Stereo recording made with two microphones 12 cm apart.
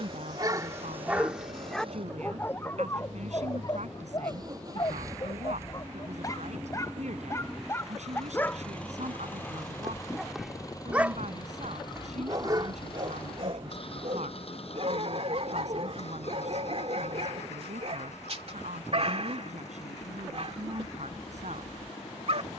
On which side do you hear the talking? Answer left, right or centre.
right.